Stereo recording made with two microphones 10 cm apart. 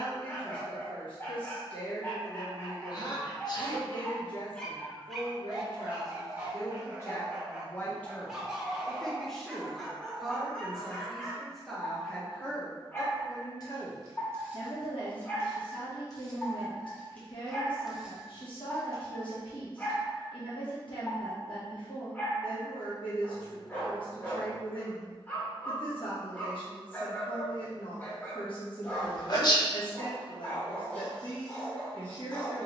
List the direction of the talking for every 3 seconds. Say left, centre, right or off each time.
left, left, left, centre, left, left, left, left, left, left, left.